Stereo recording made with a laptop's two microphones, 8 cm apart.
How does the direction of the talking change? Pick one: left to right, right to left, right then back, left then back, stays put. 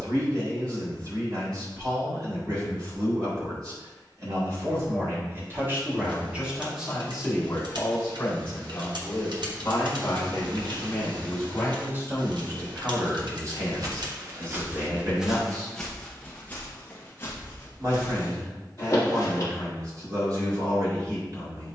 left then back.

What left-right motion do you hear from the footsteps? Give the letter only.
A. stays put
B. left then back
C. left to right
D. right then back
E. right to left
E.